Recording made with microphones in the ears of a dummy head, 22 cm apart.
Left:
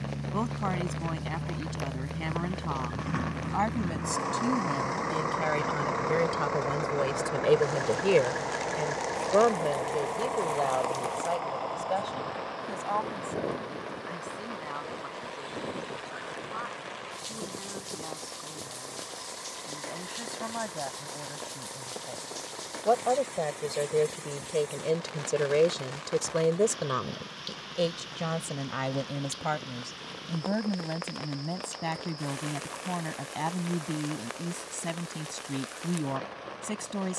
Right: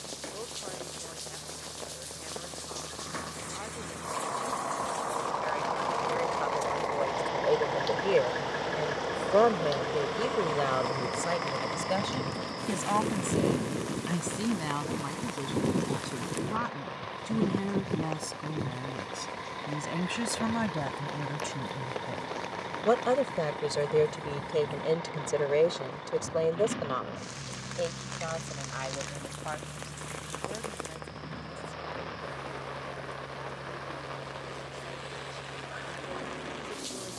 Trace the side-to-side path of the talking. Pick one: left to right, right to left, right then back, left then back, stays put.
right then back.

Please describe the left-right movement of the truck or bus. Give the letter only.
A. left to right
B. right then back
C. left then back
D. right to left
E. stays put
A.